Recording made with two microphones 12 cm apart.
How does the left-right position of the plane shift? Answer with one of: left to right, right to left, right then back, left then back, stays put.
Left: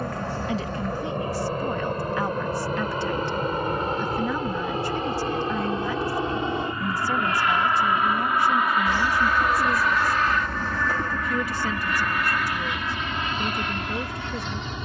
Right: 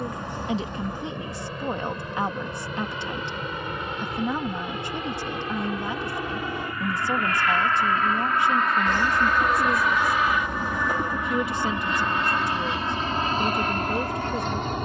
left to right.